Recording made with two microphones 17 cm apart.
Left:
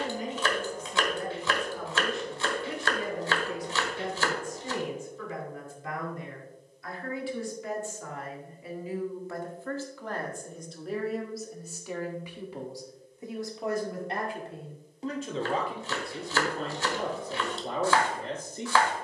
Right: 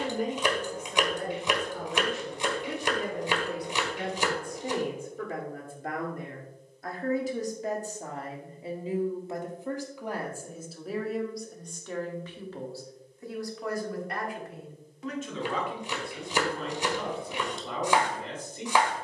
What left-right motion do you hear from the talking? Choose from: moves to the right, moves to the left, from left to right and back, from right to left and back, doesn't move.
moves to the left.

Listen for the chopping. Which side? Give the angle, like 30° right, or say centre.
20° right.